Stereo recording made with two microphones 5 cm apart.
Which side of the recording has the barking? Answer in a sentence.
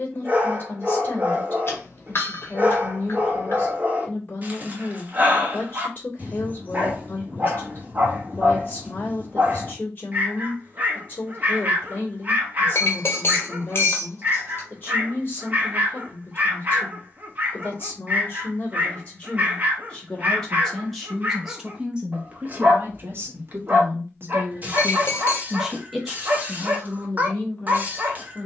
In this clip you hear the barking on the right.